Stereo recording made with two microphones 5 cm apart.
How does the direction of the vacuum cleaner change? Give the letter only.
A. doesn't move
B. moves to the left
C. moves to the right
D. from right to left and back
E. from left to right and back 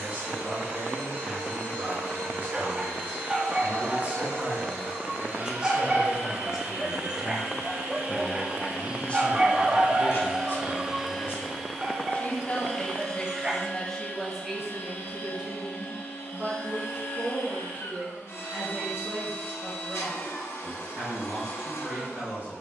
B.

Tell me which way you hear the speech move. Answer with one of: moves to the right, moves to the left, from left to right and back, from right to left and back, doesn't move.
from right to left and back.